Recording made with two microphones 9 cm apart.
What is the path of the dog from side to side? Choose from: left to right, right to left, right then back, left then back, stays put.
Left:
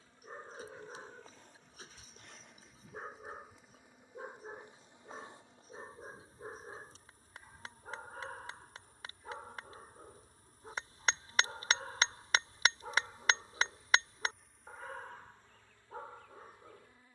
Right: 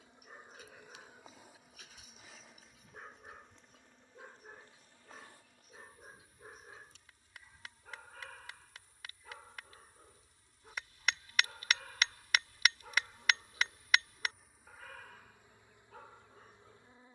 stays put.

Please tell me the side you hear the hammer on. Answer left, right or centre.
left.